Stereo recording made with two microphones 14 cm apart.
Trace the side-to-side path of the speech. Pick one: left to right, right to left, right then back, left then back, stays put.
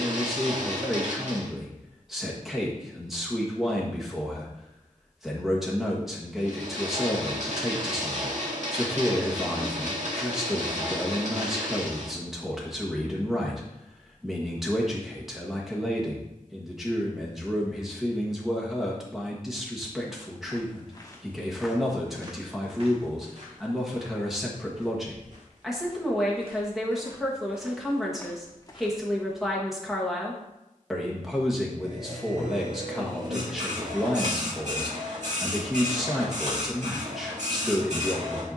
stays put.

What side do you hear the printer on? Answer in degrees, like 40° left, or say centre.
60° right.